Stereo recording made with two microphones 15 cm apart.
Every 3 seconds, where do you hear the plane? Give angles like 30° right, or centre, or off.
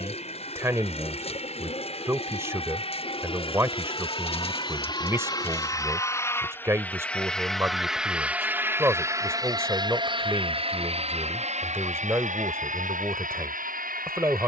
50° left, 30° left, centre, 40° right, 60° right.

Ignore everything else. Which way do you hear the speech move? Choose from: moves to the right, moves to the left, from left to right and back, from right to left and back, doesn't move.
doesn't move.